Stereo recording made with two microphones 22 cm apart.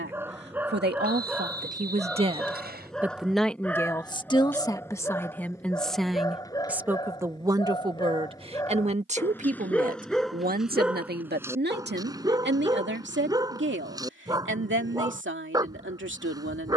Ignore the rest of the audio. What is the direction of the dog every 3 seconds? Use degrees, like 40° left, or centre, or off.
centre, 10° left, 20° left, centre, 20° right, 20° right.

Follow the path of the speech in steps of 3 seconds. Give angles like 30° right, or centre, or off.
40° right, 10° left, 20° right, 40° right, 50° right, 60° right.